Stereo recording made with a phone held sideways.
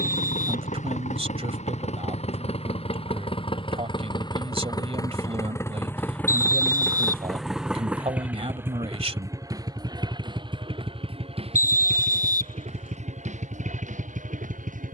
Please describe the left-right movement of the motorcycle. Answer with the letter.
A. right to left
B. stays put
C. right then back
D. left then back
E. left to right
E.